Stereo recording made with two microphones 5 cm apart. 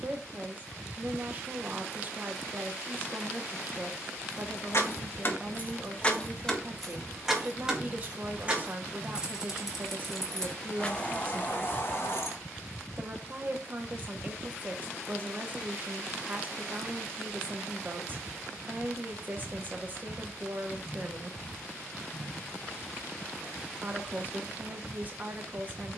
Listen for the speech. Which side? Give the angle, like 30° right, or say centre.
30° right.